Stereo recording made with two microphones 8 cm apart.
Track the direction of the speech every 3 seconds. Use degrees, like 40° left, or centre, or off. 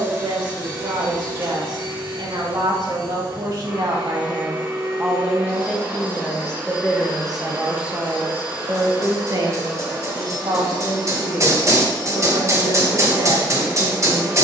70° right, 30° right, 10° right, 60° right, 70° right.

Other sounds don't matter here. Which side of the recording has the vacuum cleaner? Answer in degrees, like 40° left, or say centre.
20° right.